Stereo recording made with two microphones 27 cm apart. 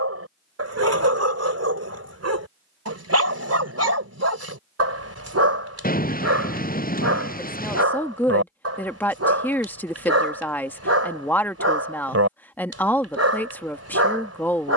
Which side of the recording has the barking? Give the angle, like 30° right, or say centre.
60° right.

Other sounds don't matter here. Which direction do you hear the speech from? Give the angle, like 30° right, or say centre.
10° left.